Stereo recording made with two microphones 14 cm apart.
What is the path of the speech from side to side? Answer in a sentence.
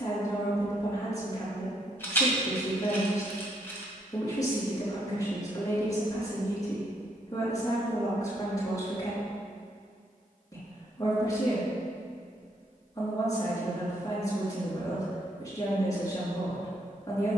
You can hear the speech stay put.